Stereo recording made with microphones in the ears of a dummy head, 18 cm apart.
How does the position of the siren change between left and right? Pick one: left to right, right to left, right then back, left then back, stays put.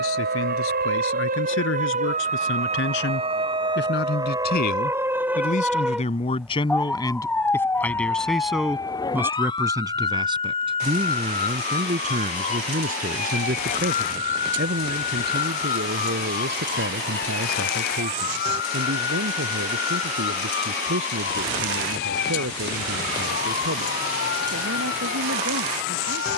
right to left.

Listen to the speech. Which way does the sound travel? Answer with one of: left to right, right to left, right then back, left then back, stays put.
left to right.